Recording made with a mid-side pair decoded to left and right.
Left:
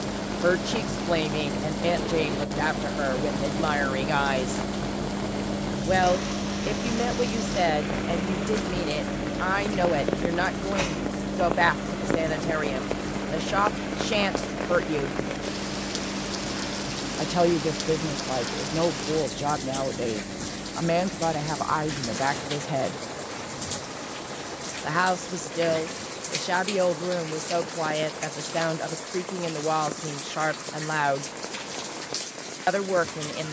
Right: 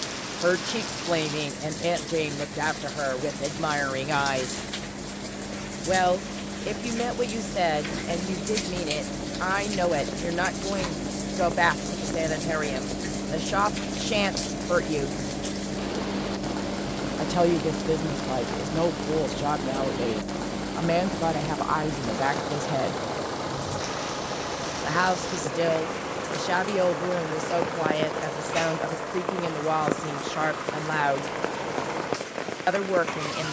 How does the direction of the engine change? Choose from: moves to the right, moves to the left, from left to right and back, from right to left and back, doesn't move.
moves to the right.